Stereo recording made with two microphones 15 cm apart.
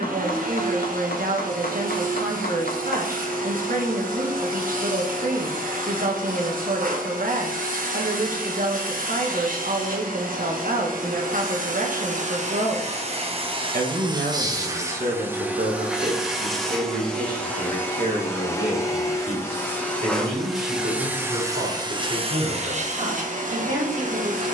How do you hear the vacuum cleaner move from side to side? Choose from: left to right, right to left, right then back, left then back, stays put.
left then back.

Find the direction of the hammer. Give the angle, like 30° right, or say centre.
80° left.